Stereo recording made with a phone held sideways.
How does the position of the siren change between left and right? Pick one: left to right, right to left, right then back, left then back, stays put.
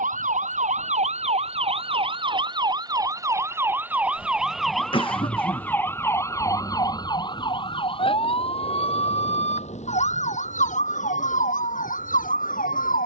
right to left.